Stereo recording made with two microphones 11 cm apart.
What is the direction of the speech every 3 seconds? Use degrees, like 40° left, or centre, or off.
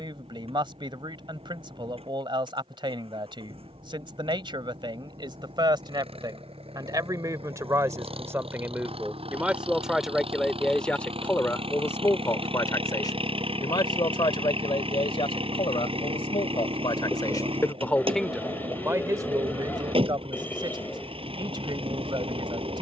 50° right, 50° right, 30° right, centre, 40° left, 50° left, 30° right, 50° right.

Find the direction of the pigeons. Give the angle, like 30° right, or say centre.
20° left.